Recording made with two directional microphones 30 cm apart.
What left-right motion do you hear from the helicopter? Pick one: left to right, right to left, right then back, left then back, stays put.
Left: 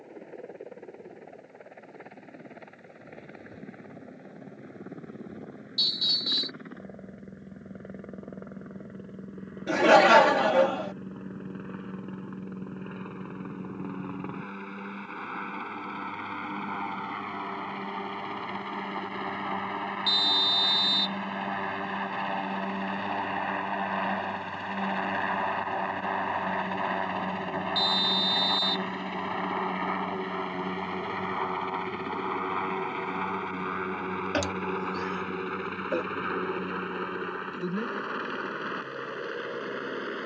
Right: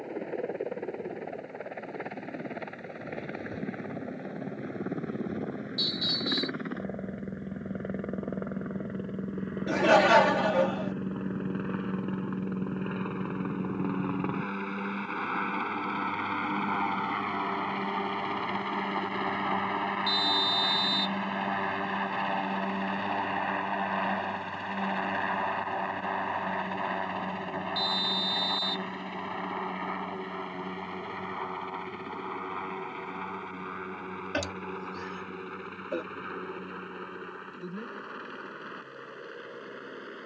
right to left.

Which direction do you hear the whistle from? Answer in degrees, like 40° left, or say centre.
30° left.